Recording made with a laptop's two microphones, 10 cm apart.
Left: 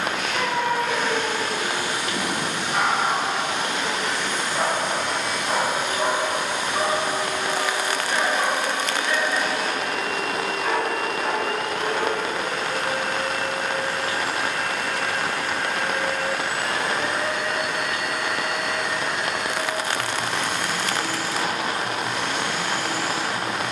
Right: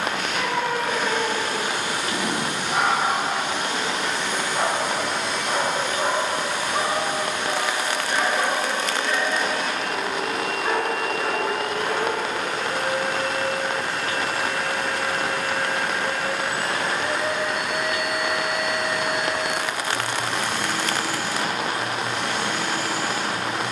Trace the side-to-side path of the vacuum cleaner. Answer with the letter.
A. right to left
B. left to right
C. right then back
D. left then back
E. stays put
D.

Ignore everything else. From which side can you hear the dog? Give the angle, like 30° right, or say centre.
30° right.